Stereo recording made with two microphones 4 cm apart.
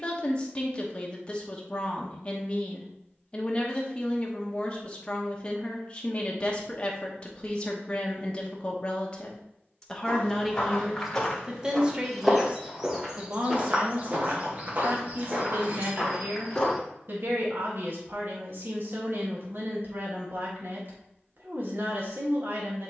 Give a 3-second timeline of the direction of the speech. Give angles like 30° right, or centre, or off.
30° left, 30° left, 30° left, centre, 40° right, 50° right, 50° right, 50° right.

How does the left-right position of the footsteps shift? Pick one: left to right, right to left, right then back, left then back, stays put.
right then back.